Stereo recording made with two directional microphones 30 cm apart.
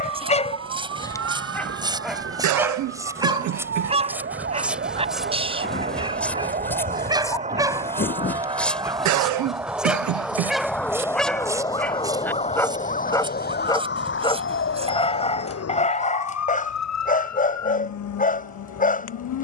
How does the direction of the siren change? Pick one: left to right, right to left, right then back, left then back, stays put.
right to left.